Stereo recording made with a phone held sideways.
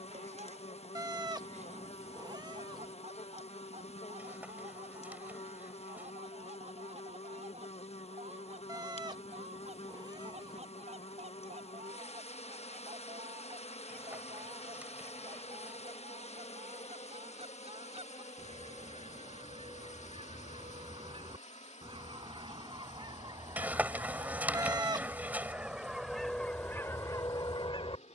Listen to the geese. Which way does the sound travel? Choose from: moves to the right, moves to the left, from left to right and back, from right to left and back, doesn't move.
moves to the left.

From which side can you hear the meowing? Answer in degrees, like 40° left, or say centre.
30° right.